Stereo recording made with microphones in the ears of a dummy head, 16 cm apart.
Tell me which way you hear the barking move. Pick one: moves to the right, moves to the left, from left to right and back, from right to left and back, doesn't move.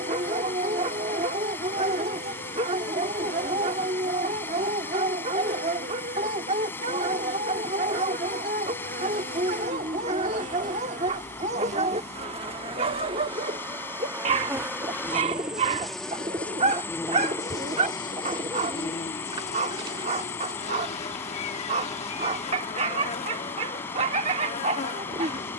doesn't move.